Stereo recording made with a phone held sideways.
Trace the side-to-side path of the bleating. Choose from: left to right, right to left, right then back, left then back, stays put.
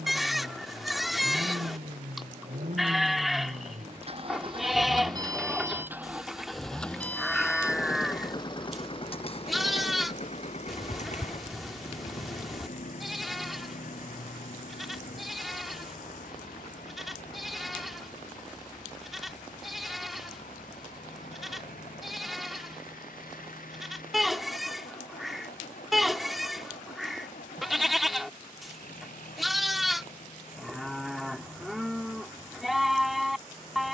stays put.